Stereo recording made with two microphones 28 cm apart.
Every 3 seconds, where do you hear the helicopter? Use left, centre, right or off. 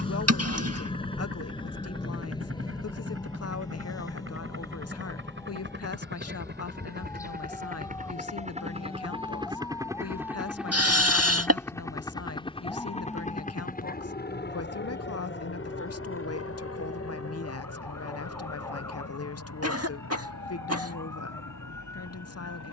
right, right, right, centre, left, left, left, left.